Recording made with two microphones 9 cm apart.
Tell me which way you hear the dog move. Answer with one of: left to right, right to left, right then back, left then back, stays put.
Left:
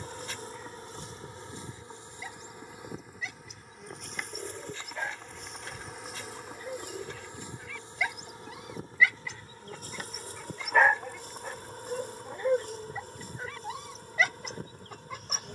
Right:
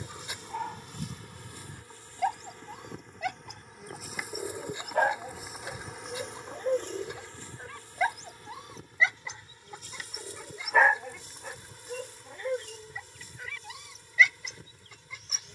right to left.